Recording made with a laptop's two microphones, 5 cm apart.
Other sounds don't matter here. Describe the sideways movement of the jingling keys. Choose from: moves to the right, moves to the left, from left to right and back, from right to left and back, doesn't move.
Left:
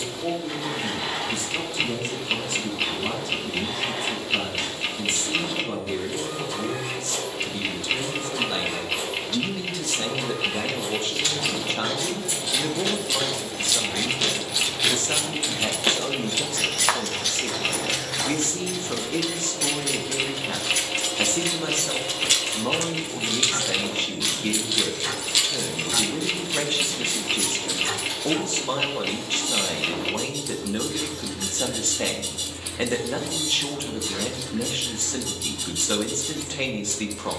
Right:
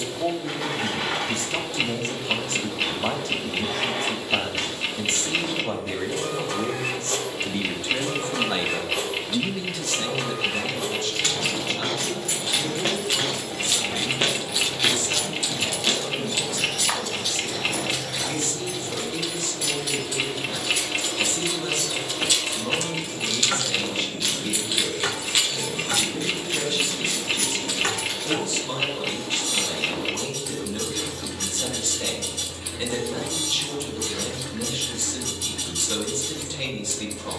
from right to left and back.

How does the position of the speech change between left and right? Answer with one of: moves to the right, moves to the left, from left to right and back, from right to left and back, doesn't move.
moves to the left.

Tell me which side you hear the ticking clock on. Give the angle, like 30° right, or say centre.
centre.